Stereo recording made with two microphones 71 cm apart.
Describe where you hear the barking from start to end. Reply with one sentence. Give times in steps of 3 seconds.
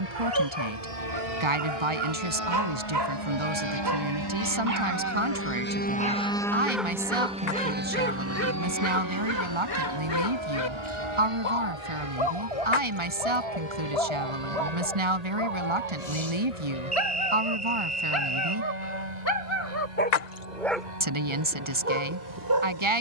You can hear the barking on the right from 0 s, in the centre from 6 s, on the left from 9 s and on the right from 21 s.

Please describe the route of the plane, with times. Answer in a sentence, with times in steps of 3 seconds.
In this clip you hear the plane on the left from 0 s, in the centre from 6 s and on the right from 9 s.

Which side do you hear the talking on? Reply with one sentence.
You can hear the talking on the right.